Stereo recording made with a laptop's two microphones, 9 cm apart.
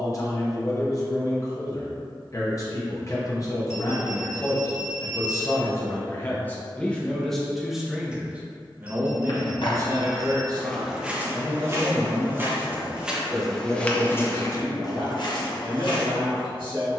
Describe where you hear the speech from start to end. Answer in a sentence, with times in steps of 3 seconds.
You can hear the speech on the left from 0 s, in the centre from 6 s and on the right from 9 s.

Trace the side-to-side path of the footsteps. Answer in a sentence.
You can hear the footsteps go right and come back.